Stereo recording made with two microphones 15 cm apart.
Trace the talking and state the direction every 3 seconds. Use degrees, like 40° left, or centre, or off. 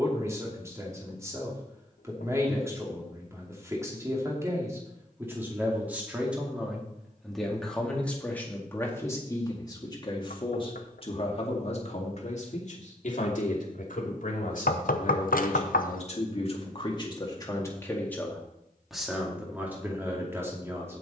20° right, 20° right, centre, 30° left, 60° left, 40° left, 10° right.